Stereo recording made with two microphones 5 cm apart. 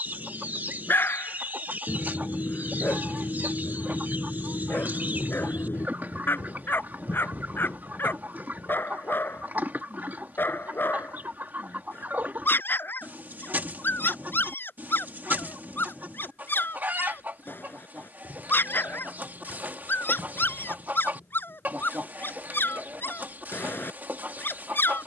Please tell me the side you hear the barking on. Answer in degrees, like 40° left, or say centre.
40° left.